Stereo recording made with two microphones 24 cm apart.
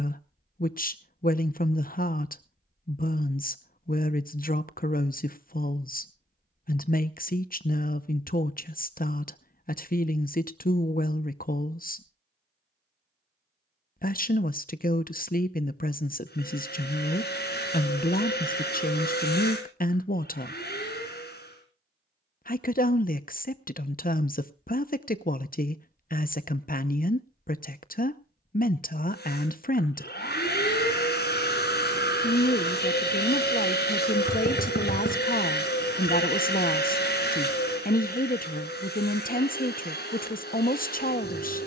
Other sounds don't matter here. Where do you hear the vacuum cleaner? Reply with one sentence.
In this clip you hear the vacuum cleaner on the left.